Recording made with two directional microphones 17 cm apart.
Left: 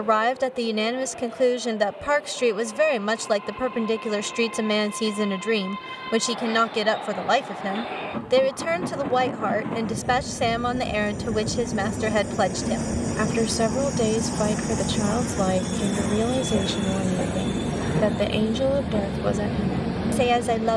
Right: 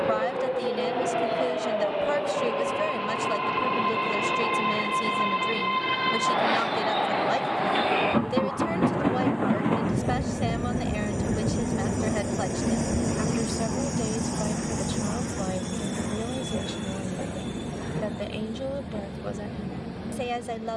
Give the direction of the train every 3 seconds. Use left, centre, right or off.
right, right, right, right, centre, left, left.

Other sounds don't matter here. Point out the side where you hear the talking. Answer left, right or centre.
left.